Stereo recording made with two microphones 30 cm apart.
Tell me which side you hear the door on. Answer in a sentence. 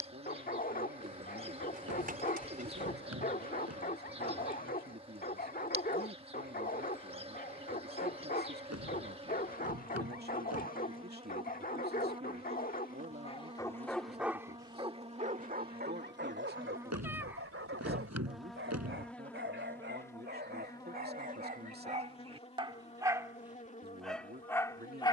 You can hear the door on the right.